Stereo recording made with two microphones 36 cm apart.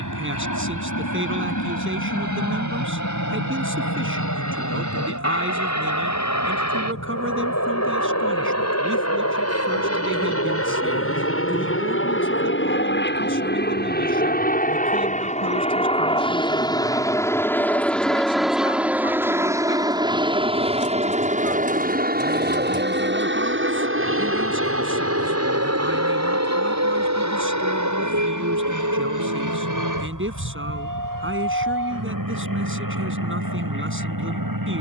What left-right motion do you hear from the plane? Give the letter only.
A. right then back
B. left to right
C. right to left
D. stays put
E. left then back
B.